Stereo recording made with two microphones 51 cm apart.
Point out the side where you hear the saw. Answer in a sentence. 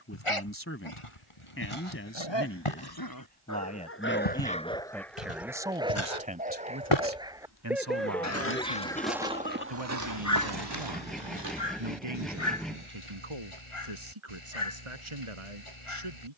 You can hear the saw in the centre.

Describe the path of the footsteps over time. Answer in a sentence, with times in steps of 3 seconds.
You can hear the footsteps on the left from 0 s, on the right from 9 s and not at all from 12 s.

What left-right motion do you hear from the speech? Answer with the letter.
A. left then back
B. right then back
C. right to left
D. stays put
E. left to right
E.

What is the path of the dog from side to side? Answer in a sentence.
You can hear the dog move from left to right and back again.